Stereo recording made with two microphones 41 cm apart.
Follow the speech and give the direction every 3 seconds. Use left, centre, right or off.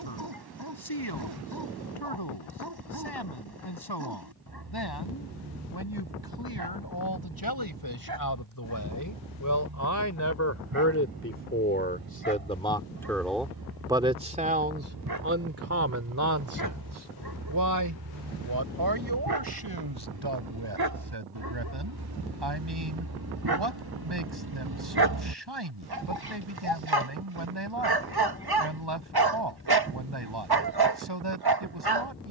left, left, left, left, centre, right, right, right, right, right, right.